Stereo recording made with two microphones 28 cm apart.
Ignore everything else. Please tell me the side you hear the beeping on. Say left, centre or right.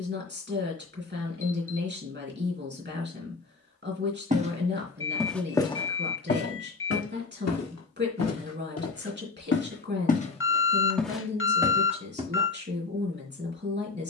left.